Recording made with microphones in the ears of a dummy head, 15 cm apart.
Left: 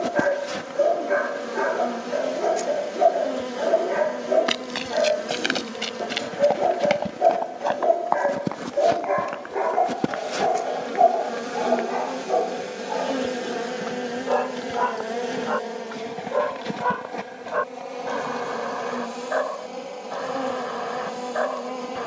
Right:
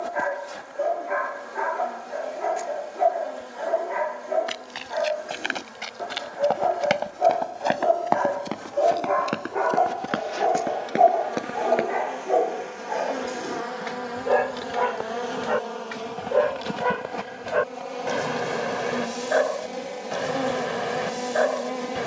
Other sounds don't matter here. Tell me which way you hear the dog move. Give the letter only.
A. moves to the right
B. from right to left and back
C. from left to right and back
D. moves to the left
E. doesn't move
A.